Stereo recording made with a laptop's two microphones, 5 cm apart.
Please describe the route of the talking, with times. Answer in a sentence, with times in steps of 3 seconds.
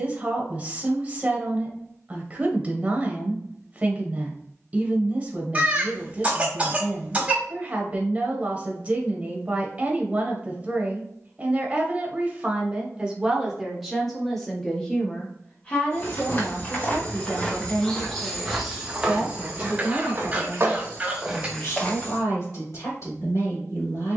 In this clip you hear the talking on the right from 0 s, in the centre from 12 s and on the left from 15 s.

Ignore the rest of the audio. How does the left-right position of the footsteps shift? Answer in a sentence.
In this clip you hear the footsteps move from left to right and back again.